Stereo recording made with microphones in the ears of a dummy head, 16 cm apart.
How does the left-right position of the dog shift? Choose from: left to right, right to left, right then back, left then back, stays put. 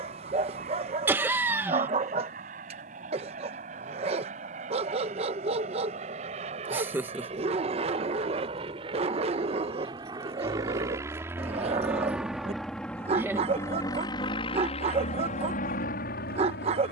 stays put.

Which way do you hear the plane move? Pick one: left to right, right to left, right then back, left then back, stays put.
right to left.